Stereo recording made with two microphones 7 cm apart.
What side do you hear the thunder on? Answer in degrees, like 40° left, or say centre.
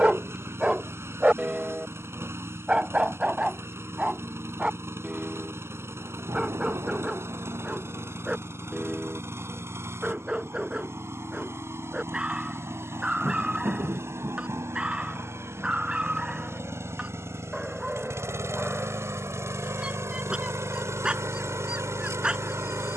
50° right.